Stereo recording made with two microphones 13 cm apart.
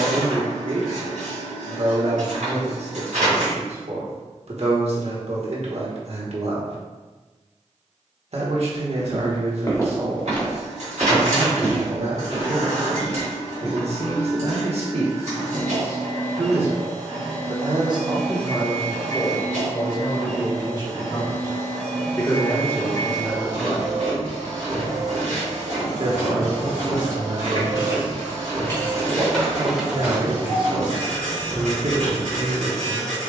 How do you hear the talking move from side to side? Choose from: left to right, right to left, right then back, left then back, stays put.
left then back.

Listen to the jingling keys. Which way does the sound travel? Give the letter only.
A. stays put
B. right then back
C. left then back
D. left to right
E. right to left
D.